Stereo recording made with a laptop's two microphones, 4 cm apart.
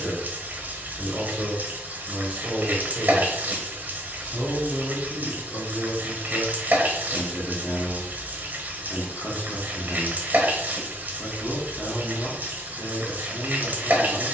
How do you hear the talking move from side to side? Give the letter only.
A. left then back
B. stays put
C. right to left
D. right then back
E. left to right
C.